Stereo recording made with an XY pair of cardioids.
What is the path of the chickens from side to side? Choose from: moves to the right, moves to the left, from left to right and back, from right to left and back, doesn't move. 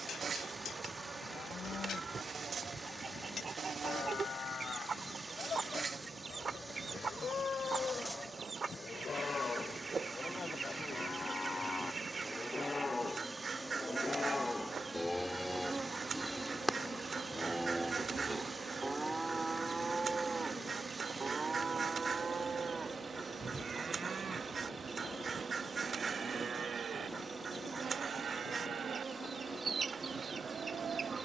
doesn't move.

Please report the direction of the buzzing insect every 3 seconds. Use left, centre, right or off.
right, right, centre, centre, centre, right, right, right, right, right, right.